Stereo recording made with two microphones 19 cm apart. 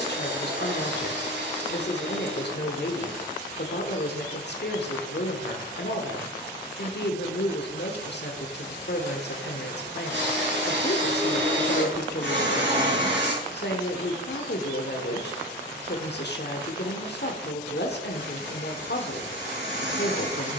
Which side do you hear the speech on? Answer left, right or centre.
left.